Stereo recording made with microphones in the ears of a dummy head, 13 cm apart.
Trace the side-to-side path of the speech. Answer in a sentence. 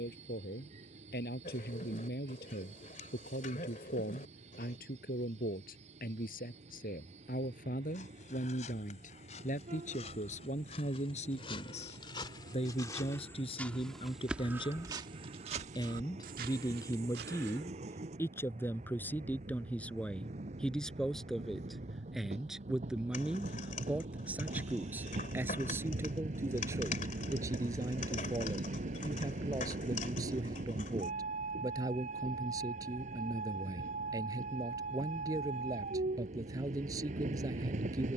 In this clip you hear the speech move from left to right.